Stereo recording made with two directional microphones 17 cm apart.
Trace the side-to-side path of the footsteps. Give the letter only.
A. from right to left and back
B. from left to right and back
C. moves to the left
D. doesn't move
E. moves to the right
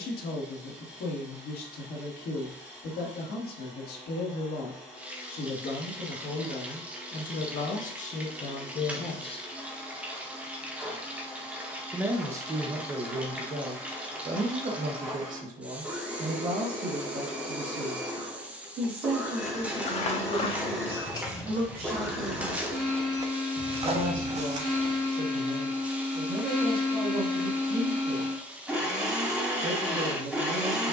E.